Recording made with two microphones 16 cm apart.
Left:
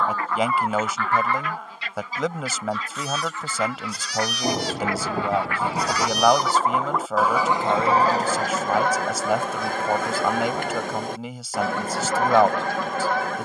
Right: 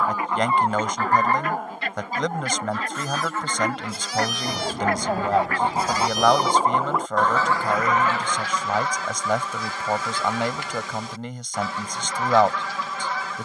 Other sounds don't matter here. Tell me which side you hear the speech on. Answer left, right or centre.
centre.